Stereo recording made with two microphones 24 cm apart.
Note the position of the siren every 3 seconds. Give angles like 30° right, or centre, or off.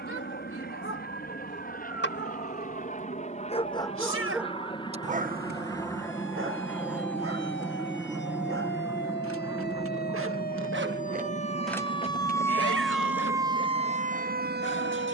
70° left, 60° left, 60° left, 40° left, 20° right.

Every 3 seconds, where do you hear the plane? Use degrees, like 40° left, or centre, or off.
40° left, 20° left, centre, 30° right, 40° right.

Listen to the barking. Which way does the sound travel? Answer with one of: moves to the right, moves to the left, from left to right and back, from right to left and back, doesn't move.
from left to right and back.